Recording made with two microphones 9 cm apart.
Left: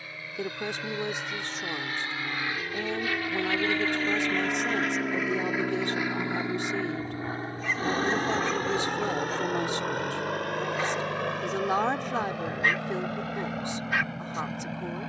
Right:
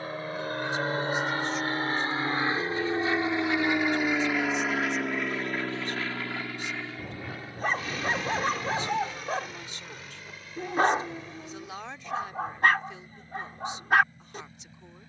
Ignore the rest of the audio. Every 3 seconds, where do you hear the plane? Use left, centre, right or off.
right, centre, left, left, left.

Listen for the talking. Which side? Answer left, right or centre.
left.